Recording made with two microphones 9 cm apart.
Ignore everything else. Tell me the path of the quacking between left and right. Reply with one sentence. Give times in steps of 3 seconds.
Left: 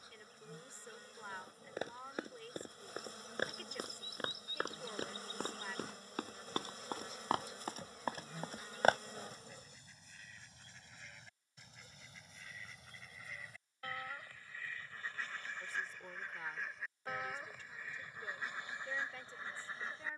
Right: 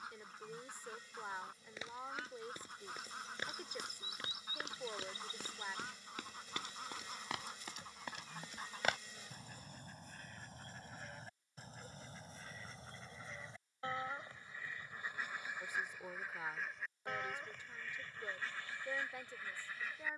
You can hear the quacking on the right from 0 s, in the centre from 15 s and on the left from 18 s.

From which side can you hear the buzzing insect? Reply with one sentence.
You can hear the buzzing insect on the left.